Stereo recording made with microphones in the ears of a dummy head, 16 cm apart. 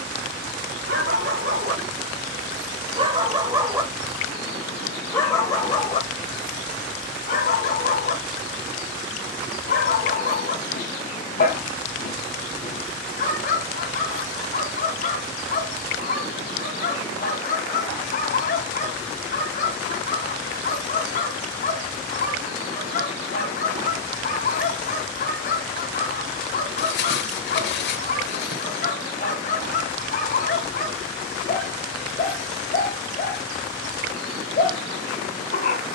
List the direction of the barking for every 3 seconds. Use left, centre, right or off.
right, centre, left, left, left, left, left, left, left, left, left, left.